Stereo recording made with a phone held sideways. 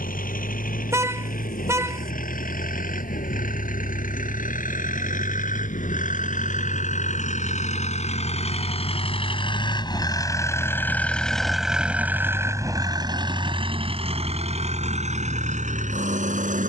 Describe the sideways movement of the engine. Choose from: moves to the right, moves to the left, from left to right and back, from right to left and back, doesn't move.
moves to the right.